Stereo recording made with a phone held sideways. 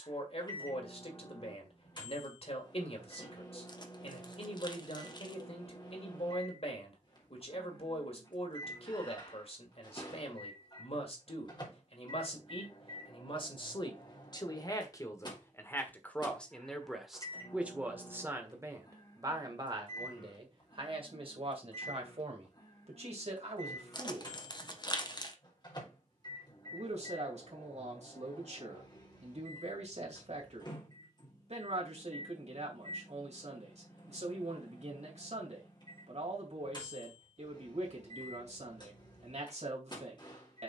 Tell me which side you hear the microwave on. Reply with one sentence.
You can hear the microwave on the left.